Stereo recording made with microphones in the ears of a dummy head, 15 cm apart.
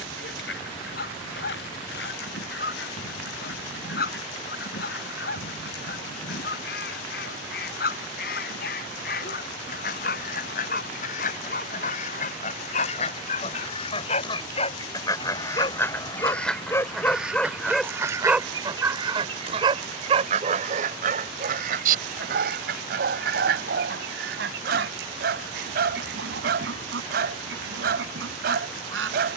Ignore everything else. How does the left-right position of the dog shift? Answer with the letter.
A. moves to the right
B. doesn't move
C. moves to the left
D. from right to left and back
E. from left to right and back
A.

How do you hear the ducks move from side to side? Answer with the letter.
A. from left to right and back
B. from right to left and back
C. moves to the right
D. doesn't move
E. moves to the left
C.